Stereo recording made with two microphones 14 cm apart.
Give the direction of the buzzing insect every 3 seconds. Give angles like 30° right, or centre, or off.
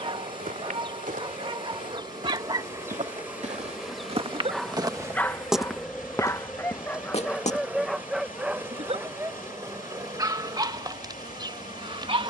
30° right, centre, 10° right, 30° right.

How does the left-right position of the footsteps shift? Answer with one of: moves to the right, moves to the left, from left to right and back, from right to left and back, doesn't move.
moves to the left.